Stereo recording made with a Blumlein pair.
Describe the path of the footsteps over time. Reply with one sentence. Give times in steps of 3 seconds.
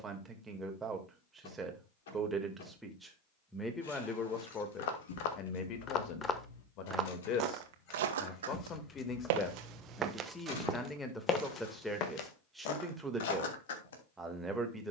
In this clip you hear the footsteps not at all from 0 s, on the left from 3 s, on the right from 6 s, in the centre from 9 s and on the left from 12 s.